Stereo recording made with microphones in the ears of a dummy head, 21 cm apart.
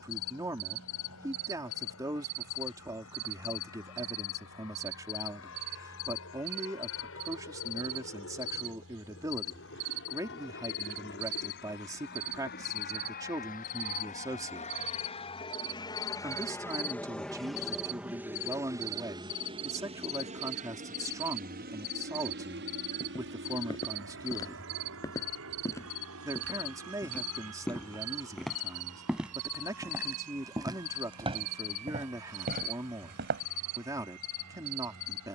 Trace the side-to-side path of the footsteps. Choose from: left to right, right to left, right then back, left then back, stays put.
left to right.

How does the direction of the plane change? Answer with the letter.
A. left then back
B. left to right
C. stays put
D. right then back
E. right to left
B.